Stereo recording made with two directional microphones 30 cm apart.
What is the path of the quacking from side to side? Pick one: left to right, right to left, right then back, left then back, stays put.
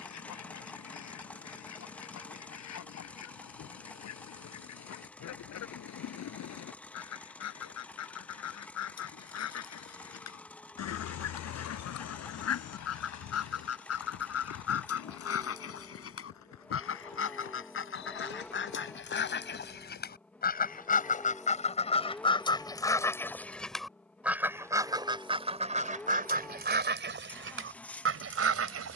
left to right.